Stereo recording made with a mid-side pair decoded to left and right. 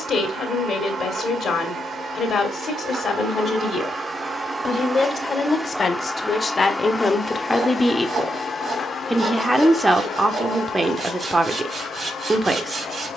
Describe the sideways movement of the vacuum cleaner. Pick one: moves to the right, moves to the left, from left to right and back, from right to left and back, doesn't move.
moves to the left.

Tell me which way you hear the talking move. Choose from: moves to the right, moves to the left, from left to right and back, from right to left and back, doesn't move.
moves to the right.